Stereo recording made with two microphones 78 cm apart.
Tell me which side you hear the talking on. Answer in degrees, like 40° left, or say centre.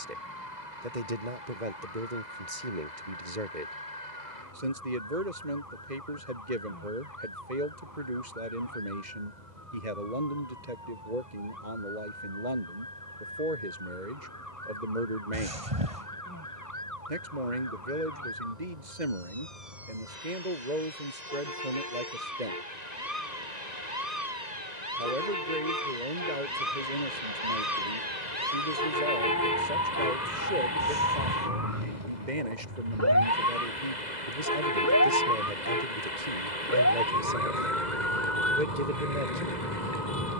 70° right.